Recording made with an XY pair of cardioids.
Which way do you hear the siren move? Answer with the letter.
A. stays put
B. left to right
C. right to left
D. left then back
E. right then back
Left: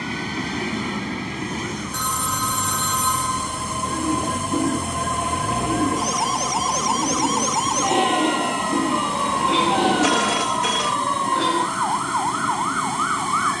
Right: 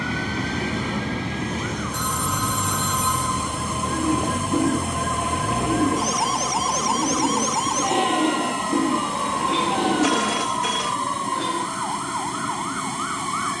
C.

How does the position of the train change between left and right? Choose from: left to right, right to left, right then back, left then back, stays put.
stays put.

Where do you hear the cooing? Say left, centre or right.
centre.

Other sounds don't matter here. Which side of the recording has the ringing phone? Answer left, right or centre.
left.